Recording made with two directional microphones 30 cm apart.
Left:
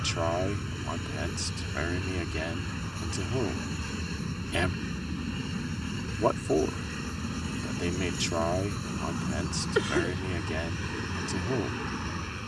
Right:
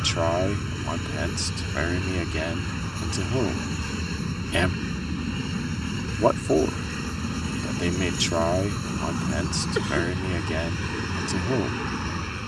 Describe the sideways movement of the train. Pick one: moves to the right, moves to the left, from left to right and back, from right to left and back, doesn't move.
doesn't move.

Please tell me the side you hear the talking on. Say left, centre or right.
right.